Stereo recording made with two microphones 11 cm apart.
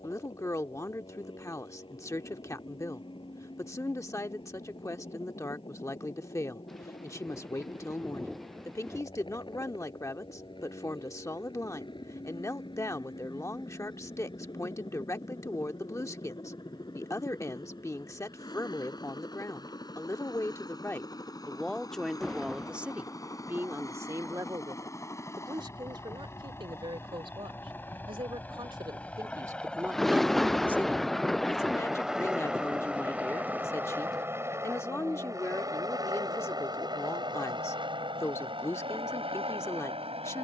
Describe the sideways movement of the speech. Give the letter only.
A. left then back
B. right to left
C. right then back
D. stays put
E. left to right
C.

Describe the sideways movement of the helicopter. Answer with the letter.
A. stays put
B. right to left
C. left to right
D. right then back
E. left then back
C.